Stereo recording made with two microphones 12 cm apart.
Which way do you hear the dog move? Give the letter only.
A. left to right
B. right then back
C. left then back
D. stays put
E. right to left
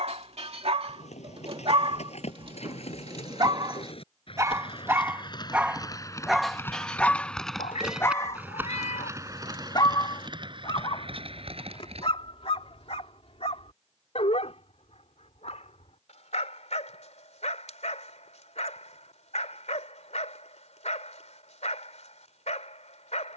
E.